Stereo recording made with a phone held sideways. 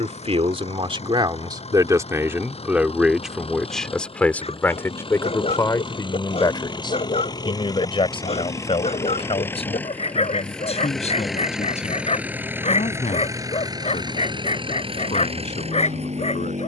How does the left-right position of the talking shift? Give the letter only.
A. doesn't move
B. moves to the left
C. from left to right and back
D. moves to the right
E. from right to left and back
B.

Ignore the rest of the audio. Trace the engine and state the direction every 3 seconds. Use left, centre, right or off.
left, left, left, centre, right, right.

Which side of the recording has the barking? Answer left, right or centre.
left.